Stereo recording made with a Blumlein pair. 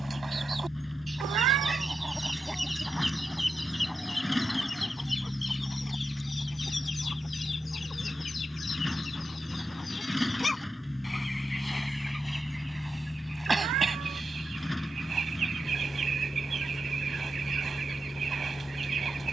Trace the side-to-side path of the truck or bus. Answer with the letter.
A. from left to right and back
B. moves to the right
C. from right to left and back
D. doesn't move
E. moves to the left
D.